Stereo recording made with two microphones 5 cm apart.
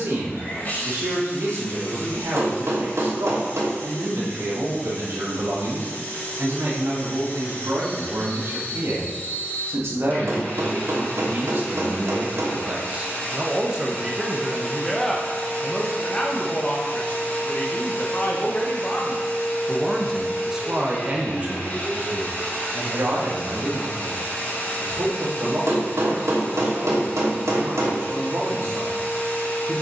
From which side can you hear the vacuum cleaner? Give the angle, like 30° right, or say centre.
30° left.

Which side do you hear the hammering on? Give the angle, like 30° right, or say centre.
80° right.